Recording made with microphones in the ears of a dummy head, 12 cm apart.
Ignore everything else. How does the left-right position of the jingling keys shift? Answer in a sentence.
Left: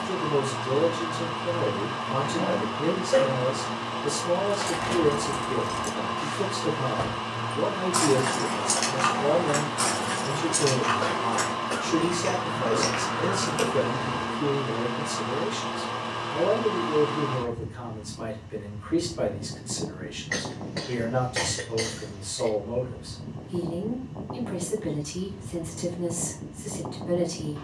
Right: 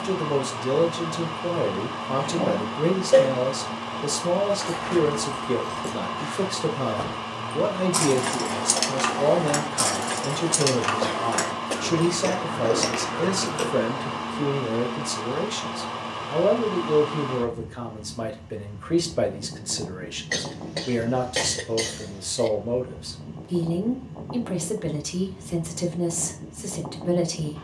You can hear the jingling keys move from left to right and back again.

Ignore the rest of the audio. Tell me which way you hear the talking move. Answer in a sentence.
You can hear the talking stay put.